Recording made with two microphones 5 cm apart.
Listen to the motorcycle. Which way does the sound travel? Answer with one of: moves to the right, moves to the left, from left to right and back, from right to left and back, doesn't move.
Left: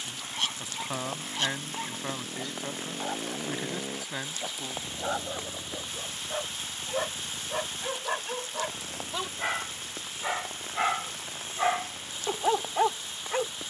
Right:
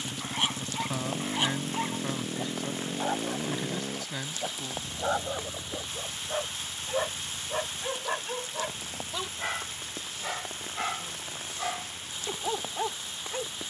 moves to the left.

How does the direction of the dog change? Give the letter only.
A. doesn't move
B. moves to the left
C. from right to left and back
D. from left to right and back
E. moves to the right
B.